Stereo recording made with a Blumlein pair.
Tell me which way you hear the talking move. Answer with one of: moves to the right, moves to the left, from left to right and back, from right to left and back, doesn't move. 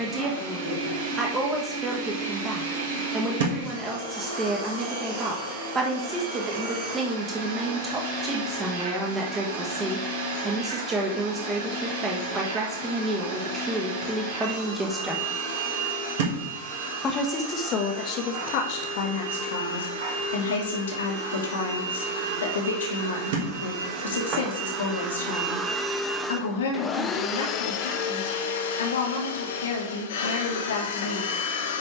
moves to the left.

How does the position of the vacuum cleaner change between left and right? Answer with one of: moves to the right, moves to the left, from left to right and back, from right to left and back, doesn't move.
moves to the left.